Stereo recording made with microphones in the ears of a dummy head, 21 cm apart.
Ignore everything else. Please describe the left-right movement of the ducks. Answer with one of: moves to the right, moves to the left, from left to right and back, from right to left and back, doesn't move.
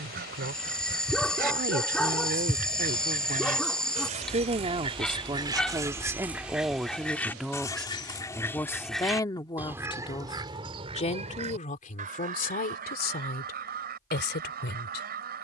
from right to left and back.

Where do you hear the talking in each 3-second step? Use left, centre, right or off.
right, right, centre, left, left.